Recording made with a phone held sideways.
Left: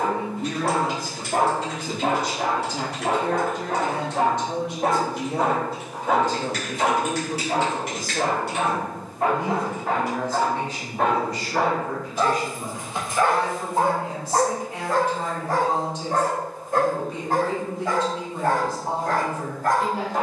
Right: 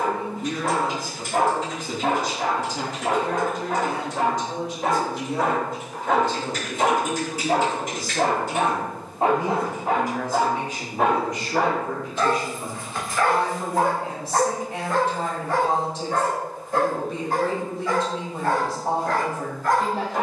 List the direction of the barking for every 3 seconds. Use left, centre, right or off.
left, left, right, centre, left, left, left.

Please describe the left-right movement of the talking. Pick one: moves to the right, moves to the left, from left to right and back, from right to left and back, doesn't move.
moves to the right.